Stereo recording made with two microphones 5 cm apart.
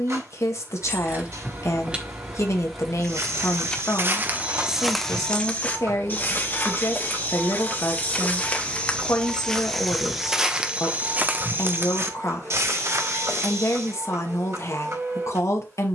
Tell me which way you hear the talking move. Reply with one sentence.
You can hear the talking stay put.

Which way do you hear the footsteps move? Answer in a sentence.
You can hear the footsteps move from right to left and back again.